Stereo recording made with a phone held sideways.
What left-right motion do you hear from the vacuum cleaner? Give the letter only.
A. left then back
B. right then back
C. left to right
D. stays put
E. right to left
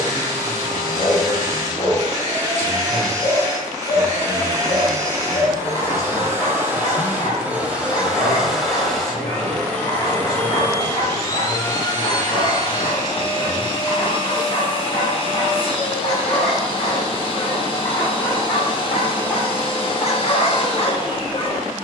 E.